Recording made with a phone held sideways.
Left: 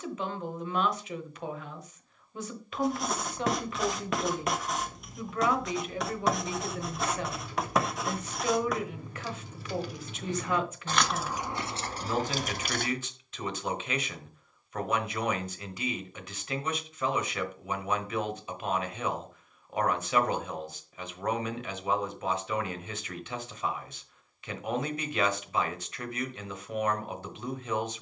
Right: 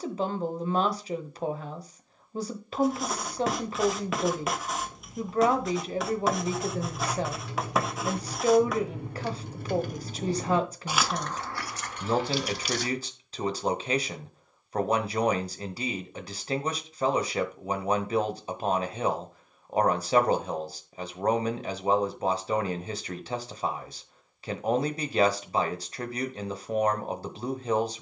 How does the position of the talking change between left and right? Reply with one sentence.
In this clip you hear the talking stay put.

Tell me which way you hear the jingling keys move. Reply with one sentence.
In this clip you hear the jingling keys move from right to left.